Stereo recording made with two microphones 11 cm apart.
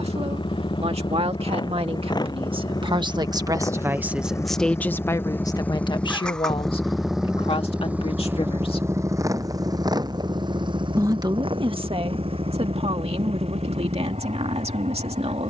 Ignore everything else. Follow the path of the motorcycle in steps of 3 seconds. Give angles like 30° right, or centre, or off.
40° left, 30° left, 10° right, 40° right, 60° right.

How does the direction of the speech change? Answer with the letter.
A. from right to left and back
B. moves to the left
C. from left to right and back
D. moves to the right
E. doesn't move
A.